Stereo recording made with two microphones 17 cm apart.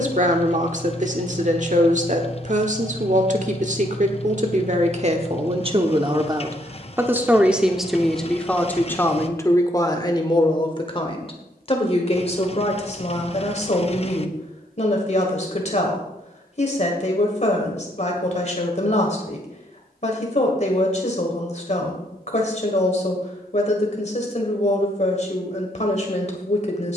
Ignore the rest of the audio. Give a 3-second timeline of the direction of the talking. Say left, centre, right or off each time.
right, right, centre, left, left, left, left, left, left.